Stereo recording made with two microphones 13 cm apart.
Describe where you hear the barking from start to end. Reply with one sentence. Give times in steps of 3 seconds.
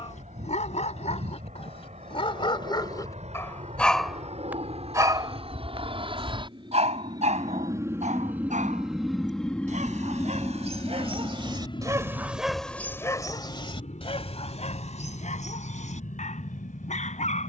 You can hear the barking on the left from 0 s, in the centre from 3 s, on the right from 6 s and on the left from 12 s.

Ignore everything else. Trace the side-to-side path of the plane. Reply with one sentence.
You can hear the plane travel towards the left.